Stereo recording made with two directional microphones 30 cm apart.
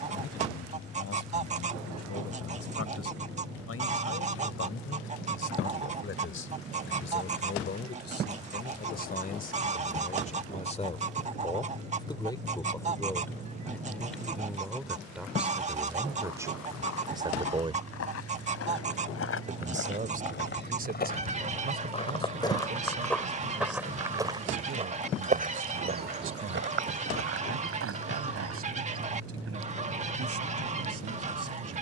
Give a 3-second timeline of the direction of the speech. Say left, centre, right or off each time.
left, left, left, left, centre, centre, right, right, right, right, right.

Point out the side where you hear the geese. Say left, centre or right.
right.